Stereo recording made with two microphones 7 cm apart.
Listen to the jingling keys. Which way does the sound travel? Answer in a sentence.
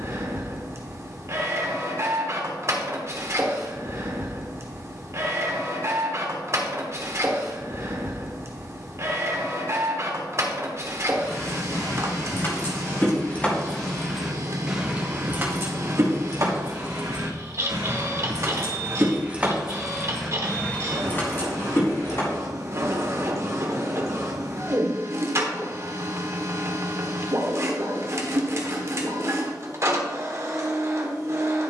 You can hear the jingling keys go right and come back.